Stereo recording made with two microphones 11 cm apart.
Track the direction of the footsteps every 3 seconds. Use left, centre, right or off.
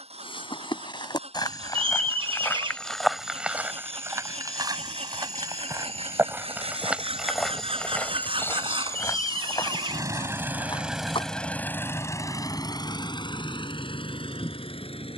left, right, centre, left, off.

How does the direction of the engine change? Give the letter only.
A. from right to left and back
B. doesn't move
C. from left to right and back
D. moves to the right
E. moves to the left
E.